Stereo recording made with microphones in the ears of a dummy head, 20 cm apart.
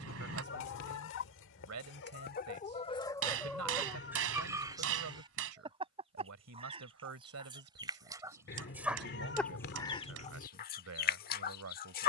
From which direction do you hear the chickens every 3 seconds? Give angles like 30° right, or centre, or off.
50° left, 10° right, 20° right, 40° left.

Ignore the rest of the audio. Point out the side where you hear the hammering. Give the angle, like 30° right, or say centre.
70° right.